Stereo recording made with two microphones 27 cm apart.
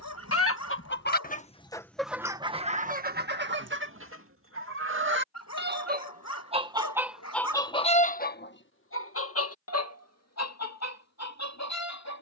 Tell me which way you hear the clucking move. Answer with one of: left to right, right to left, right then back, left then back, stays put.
right then back.